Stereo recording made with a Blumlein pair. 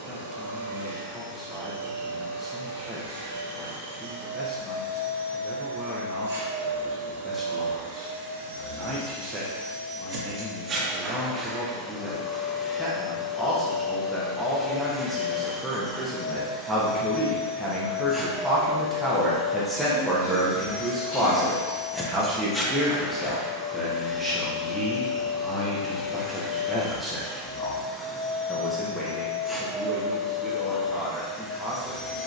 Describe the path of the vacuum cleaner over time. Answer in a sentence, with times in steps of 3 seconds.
You can hear the vacuum cleaner on the right from 0 s and in the centre from 12 s.